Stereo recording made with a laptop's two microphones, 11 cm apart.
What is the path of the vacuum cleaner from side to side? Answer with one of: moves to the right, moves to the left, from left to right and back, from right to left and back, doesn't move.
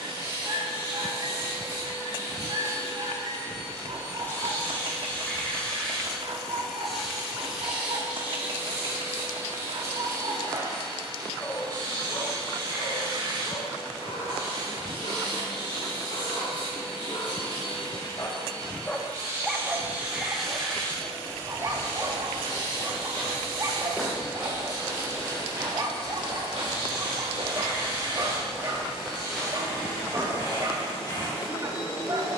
from left to right and back.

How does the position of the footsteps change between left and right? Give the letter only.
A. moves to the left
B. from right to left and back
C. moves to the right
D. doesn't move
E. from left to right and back
E.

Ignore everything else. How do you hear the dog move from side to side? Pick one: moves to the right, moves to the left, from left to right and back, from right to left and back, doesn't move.
from right to left and back.